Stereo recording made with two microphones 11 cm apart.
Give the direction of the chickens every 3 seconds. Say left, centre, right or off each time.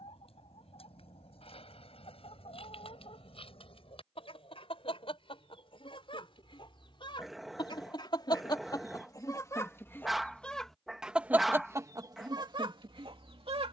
left, left, left, centre, right.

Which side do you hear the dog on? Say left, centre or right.
centre.